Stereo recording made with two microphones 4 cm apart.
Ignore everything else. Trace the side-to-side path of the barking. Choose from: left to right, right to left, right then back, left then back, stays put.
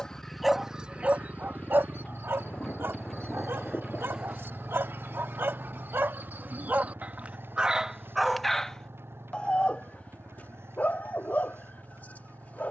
right then back.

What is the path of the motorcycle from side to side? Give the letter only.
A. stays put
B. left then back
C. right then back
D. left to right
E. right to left
D.